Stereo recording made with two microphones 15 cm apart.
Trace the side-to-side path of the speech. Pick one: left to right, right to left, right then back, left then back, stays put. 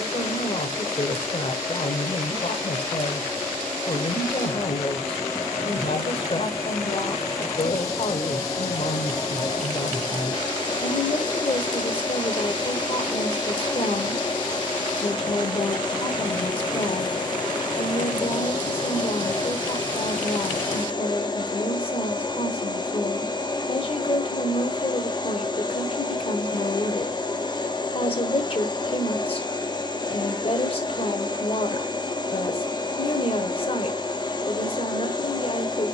stays put.